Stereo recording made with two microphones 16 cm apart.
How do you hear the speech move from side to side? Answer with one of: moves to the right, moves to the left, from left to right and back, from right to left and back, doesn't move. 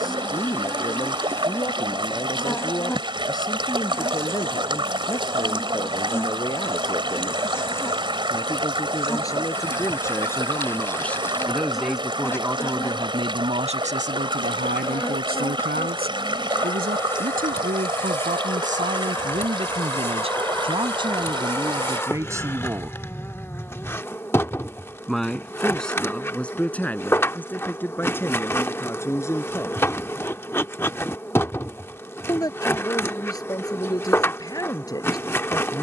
from left to right and back.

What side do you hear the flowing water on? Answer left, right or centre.
right.